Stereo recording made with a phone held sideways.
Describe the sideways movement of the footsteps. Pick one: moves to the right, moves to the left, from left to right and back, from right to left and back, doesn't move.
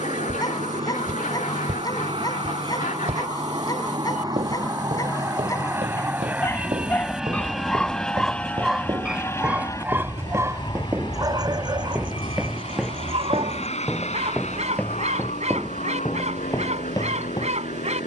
moves to the left.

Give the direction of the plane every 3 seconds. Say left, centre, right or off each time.
right, right, centre, left, left, left.